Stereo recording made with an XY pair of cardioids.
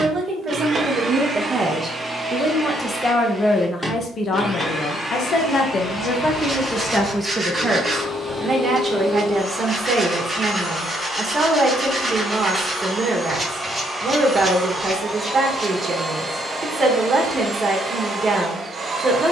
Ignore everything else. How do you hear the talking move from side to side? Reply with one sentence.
In this clip you hear the talking move from right to left and back again.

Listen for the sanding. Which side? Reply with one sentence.
You can hear the sanding in the centre.